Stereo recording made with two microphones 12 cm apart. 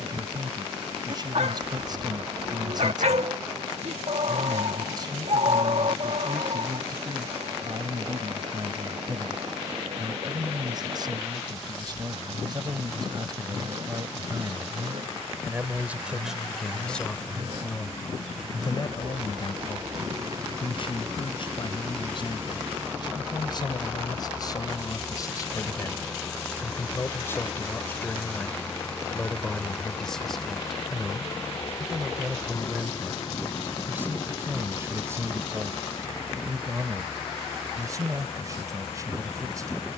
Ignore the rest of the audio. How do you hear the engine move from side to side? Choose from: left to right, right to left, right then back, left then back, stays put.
right to left.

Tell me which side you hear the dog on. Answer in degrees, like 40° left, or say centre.
70° right.